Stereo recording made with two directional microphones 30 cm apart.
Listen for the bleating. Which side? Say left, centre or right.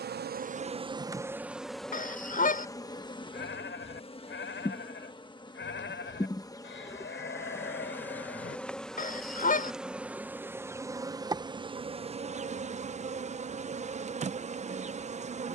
left.